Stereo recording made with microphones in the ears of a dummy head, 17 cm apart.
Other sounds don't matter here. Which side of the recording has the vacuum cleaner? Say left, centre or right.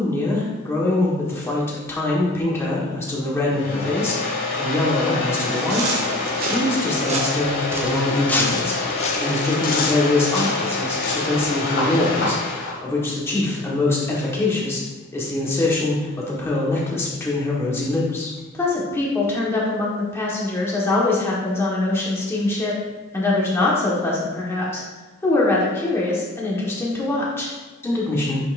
left.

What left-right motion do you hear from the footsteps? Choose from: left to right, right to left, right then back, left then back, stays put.
right to left.